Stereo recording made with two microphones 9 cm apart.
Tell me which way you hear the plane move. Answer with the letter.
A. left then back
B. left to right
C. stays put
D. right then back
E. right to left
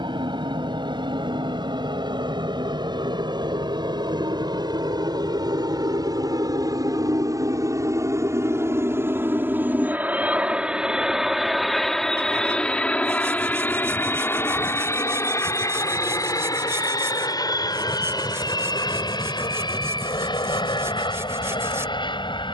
E.